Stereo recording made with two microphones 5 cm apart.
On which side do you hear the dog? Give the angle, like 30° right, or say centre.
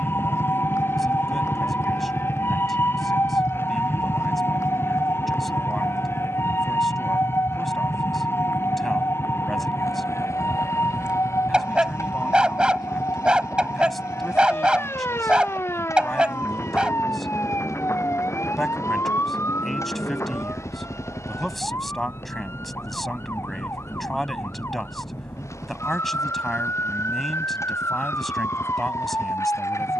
20° right.